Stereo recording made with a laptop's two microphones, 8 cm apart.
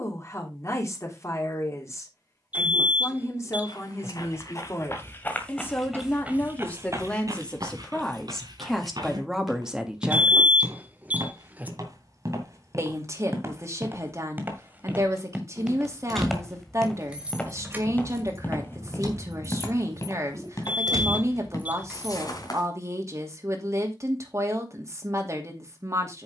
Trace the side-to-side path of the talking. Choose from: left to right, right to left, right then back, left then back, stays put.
left to right.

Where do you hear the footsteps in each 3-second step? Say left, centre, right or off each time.
off, left, right, right, right, centre, left, left, off.